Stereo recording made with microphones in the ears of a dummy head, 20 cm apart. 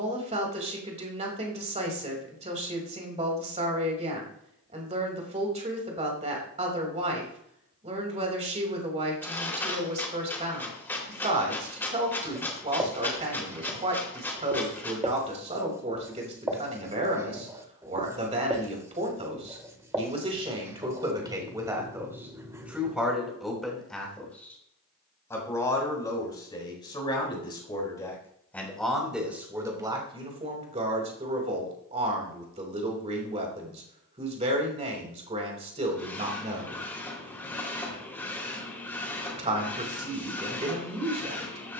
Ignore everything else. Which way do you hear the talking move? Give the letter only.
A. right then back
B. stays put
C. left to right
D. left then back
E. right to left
D.